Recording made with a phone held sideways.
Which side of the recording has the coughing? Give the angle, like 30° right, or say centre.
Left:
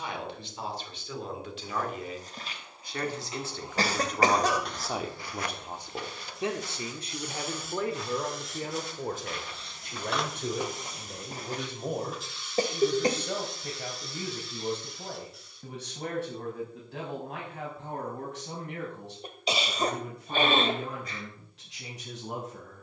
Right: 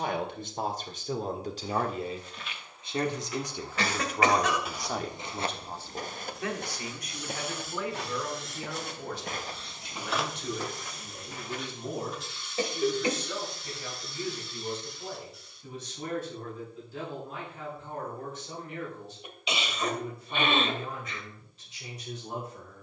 40° left.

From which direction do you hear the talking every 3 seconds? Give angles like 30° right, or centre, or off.
40° right, centre, 30° left, 50° left, 60° left, 70° left, 70° left, 70° left.